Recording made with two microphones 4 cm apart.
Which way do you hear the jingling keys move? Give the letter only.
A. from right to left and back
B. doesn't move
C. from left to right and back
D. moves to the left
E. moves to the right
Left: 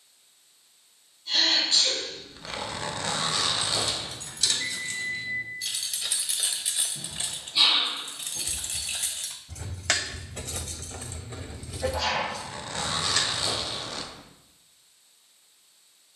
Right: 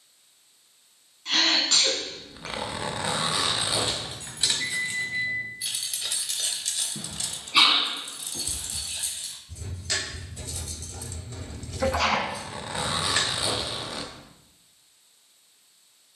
A.